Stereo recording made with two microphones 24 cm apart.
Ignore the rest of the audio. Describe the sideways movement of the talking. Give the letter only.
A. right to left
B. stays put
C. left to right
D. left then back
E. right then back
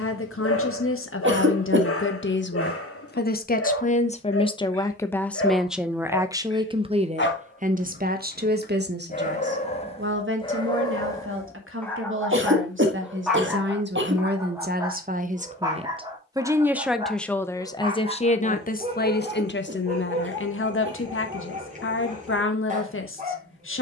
E.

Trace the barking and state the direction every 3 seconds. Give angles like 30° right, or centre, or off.
70° left, 70° left, 40° left, 20° left, centre, 20° right, 30° right, 30° right.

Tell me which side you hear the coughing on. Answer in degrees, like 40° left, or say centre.
50° right.